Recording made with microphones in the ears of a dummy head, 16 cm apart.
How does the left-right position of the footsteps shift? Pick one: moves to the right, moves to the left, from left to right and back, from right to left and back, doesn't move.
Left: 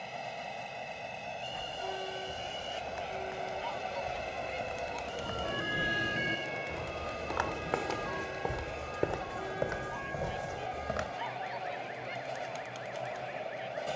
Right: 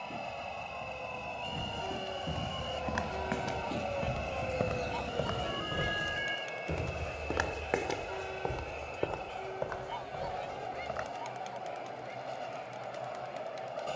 moves to the left.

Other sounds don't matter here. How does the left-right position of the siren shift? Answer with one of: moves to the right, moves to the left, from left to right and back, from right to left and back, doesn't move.
moves to the left.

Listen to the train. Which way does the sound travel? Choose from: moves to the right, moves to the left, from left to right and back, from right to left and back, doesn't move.
doesn't move.